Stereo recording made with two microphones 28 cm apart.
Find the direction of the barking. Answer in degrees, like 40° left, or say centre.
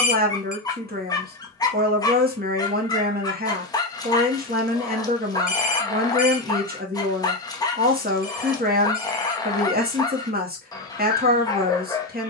10° left.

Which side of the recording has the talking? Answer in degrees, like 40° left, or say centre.
30° right.